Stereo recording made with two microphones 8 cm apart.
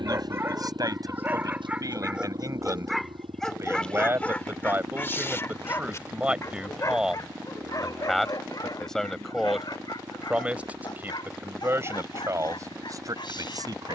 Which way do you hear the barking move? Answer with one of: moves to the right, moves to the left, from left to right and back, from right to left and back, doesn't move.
moves to the left.